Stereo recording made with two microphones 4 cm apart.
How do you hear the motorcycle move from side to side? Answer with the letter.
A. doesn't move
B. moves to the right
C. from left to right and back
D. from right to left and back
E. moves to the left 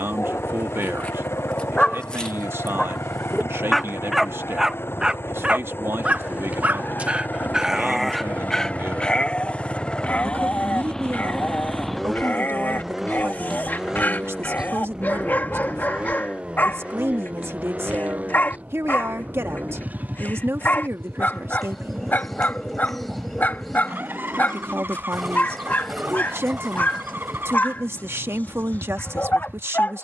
B.